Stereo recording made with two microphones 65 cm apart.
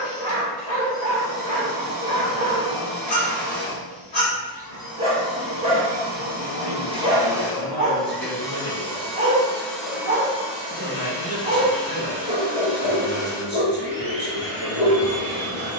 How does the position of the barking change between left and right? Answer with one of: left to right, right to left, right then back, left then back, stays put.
stays put.